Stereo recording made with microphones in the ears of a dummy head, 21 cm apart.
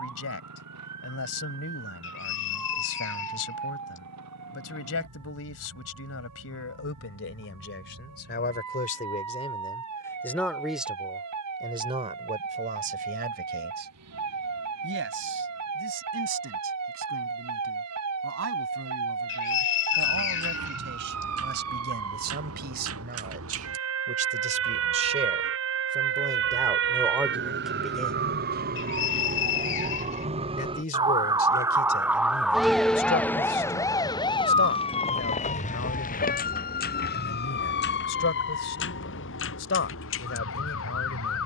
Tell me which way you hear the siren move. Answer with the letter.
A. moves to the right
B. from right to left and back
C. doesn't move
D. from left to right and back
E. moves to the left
E.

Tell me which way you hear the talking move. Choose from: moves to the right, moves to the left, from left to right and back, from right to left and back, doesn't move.
from left to right and back.